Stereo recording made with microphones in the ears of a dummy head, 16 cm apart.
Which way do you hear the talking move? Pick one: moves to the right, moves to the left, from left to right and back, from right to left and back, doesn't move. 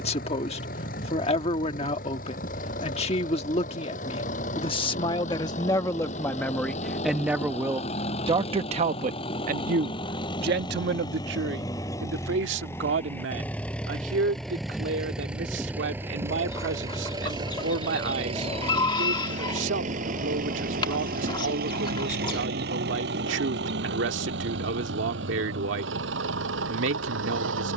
moves to the right.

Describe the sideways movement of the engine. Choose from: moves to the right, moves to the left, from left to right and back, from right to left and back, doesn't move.
moves to the right.